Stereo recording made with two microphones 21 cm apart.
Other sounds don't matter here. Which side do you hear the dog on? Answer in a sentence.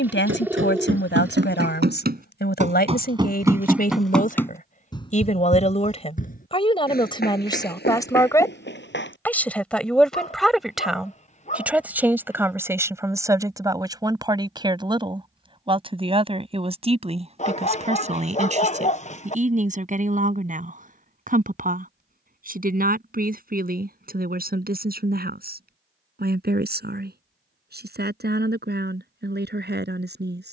In this clip you hear the dog on the left.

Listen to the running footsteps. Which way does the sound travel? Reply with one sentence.
In this clip you hear the running footsteps travel towards the left.